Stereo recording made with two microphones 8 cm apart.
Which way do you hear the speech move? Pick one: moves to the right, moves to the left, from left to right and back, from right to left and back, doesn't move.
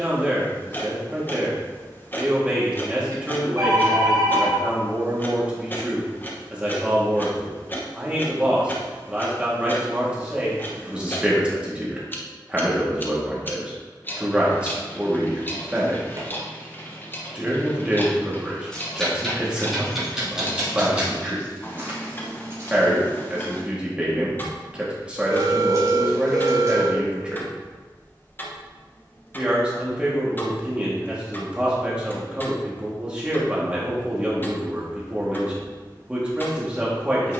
doesn't move.